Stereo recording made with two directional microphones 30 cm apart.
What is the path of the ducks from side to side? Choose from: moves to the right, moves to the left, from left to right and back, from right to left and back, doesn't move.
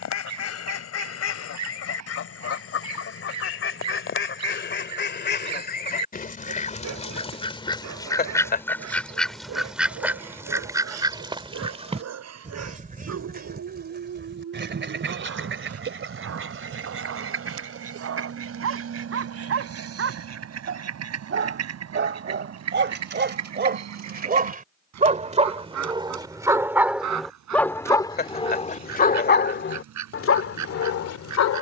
moves to the right.